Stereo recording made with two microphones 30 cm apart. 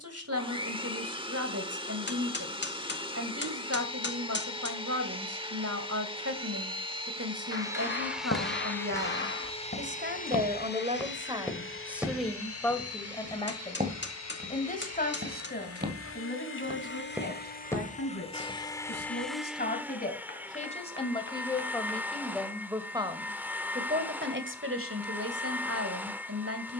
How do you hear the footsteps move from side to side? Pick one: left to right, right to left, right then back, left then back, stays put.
right then back.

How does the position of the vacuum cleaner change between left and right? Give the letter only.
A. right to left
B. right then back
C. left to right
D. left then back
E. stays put
D.